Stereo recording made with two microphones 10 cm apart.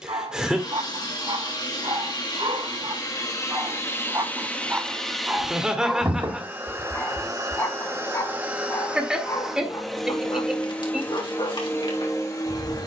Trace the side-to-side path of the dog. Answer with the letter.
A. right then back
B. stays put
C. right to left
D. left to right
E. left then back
C.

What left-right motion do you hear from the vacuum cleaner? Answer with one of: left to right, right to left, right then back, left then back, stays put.
right then back.